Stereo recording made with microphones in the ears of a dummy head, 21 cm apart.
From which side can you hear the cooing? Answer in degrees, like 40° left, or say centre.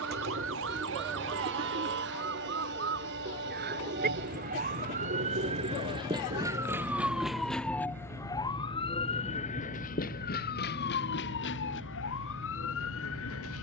40° right.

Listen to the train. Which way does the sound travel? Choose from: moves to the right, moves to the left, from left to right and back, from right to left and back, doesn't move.
doesn't move.